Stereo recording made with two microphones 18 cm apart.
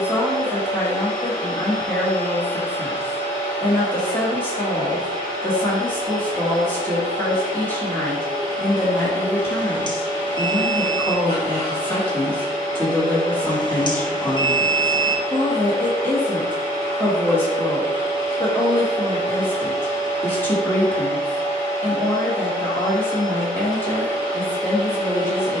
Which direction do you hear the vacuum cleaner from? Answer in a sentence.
You can hear the vacuum cleaner on the left.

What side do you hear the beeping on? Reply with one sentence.
In this clip you hear the beeping on the left.